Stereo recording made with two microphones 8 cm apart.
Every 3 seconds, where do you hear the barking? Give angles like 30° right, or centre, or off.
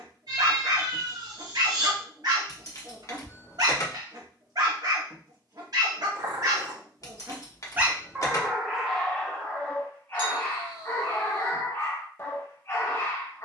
60° right, 60° right, 20° right, 30° left, 30° left.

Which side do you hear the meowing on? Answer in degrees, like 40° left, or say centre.
60° right.